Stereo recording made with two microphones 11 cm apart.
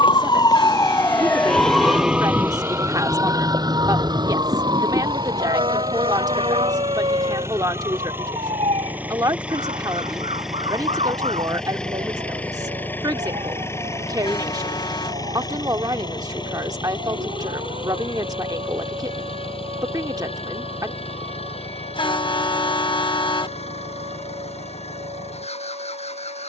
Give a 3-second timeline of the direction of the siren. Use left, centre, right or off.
centre, right, right, right, right, right, right, right, right.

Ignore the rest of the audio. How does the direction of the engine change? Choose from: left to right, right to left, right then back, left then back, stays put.
right to left.